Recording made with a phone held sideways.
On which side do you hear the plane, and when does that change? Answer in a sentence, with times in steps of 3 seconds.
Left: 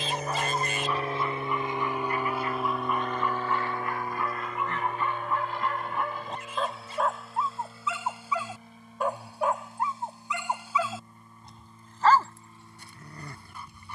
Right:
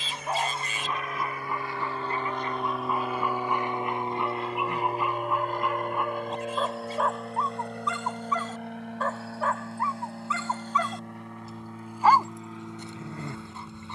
You can hear the plane on the left from 0 s and on the right from 3 s.